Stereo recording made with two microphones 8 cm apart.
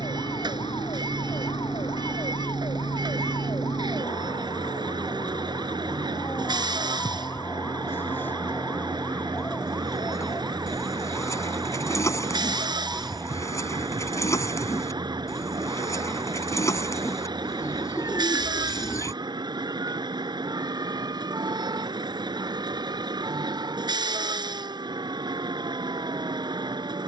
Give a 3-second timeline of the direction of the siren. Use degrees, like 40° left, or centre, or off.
70° left, 50° left, 30° left, centre, 20° right, 30° right, 40° right, 50° right, 50° right.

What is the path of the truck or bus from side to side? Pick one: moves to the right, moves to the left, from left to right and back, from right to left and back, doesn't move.
doesn't move.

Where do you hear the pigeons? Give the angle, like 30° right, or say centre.
40° left.